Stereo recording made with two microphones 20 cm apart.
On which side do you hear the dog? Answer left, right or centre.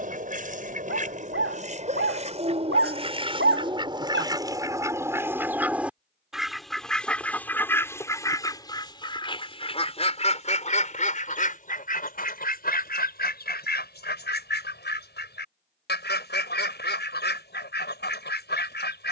right.